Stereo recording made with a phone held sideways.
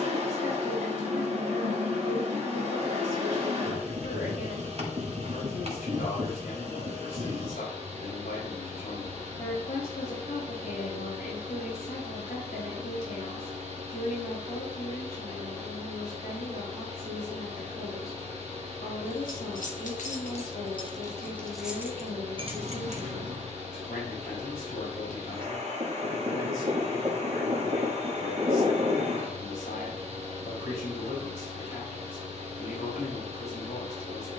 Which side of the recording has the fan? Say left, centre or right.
right.